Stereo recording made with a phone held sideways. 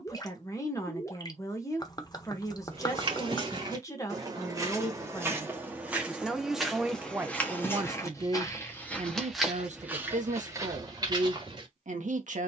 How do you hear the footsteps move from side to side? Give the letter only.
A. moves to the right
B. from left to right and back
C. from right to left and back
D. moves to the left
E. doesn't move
C.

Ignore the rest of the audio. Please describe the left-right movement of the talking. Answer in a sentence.
In this clip you hear the talking move from left to right.